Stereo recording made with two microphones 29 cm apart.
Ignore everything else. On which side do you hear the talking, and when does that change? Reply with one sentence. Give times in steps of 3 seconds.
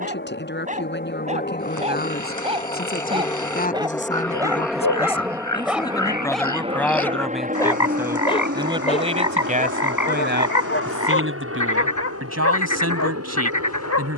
You can hear the talking on the left from 0 s, in the centre from 6 s and on the right from 9 s.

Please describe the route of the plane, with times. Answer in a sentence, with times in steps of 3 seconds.
In this clip you hear the plane on the left from 0 s, in the centre from 3 s and on the right from 6 s.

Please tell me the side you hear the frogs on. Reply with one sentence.
You can hear the frogs on the left.